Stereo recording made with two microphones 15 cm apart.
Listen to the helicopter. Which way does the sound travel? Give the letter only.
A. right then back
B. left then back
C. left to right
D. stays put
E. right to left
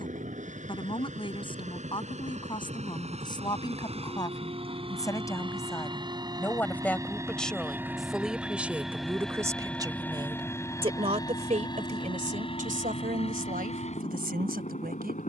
E.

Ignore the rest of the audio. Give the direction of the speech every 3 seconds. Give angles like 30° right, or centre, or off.
30° left, 20° left, centre, 30° right, 70° right.